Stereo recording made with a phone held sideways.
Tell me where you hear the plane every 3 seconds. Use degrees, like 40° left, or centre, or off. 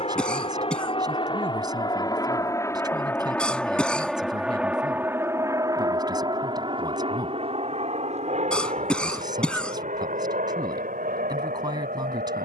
30° left, 10° right, 40° right, 60° right.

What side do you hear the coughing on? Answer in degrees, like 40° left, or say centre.
10° left.